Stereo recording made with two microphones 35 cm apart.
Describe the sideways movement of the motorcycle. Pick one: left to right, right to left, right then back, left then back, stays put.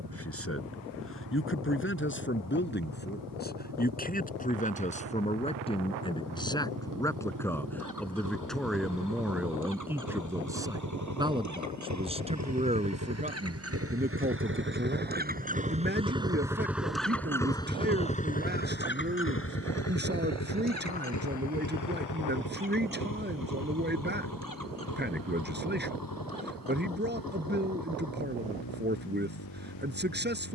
right to left.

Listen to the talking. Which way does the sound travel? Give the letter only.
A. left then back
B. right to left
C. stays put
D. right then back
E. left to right
E.